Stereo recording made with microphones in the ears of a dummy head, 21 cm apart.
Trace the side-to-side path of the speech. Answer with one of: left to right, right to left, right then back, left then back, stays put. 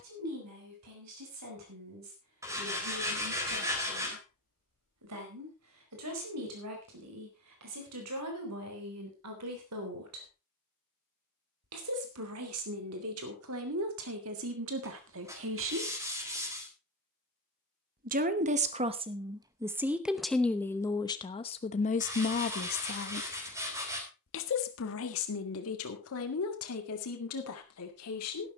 right to left.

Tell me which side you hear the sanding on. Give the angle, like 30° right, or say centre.
10° right.